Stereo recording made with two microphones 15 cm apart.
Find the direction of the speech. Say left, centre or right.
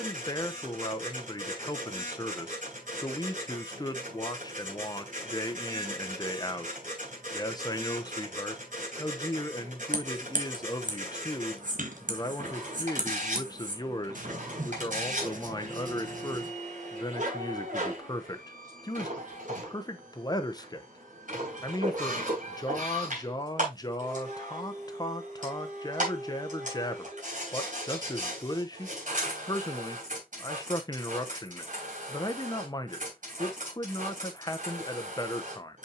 left.